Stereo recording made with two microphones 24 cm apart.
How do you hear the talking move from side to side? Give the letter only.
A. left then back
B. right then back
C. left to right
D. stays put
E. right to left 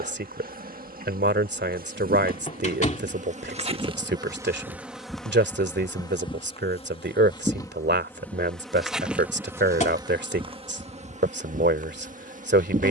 D.